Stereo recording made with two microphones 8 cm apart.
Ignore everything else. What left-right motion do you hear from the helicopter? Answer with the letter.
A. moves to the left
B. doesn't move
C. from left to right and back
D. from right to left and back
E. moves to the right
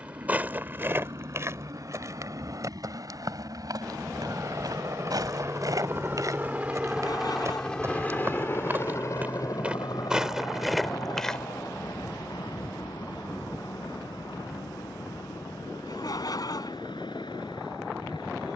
A.